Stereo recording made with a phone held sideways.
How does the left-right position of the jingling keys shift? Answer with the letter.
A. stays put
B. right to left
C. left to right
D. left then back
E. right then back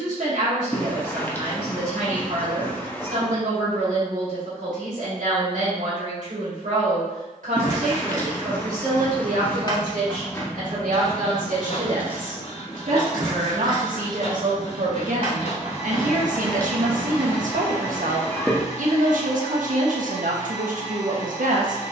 C.